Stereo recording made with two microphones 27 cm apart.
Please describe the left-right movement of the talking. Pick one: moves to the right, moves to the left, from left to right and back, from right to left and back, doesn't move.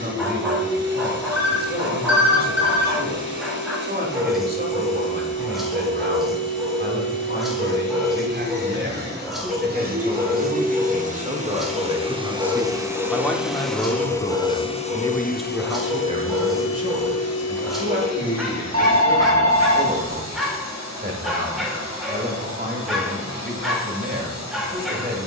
from right to left and back.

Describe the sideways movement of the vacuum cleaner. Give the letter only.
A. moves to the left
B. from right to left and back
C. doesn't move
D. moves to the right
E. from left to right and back
A.